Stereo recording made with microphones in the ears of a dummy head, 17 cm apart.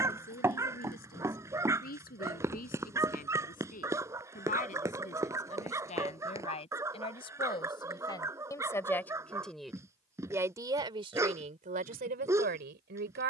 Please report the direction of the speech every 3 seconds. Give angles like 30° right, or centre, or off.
50° left, 40° left, 30° left, 20° right, 60° right.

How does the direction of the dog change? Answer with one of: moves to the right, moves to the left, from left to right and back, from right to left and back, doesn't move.
doesn't move.